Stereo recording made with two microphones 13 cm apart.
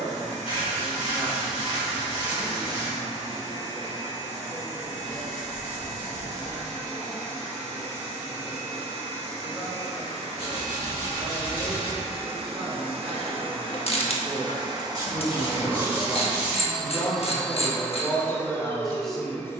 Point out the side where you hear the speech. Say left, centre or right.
centre.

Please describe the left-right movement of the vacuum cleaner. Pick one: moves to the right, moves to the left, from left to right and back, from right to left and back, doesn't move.
moves to the left.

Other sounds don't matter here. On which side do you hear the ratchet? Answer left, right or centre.
left.